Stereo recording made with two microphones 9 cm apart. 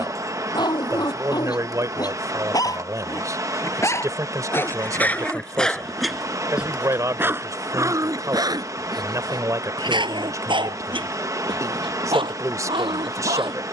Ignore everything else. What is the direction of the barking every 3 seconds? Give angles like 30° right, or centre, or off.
50° left, 20° left, 30° right, 60° right, 80° right.